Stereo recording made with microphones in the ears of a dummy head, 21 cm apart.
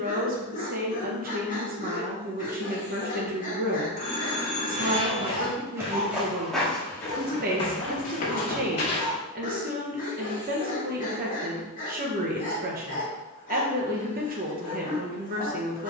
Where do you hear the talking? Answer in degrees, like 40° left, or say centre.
40° right.